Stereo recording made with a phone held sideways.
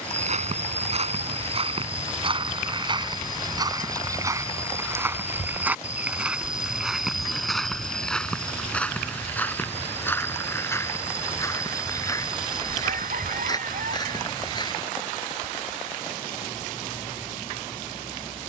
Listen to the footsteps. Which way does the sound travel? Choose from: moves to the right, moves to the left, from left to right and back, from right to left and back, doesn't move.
moves to the left.